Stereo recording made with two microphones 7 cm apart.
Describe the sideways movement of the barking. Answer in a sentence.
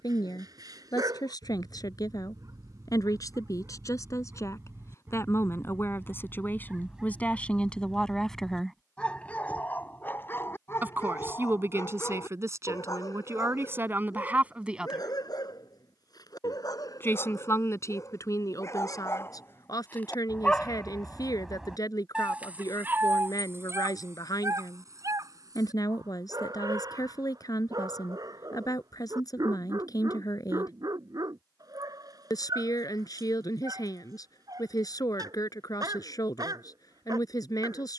In this clip you hear the barking go left and come back.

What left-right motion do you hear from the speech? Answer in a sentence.
You can hear the speech move from left to right and back again.